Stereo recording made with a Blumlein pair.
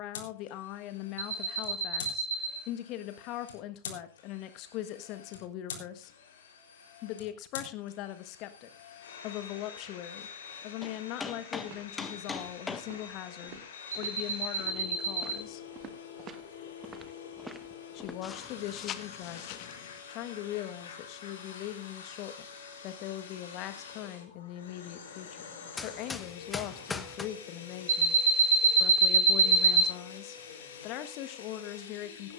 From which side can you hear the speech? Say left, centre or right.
left.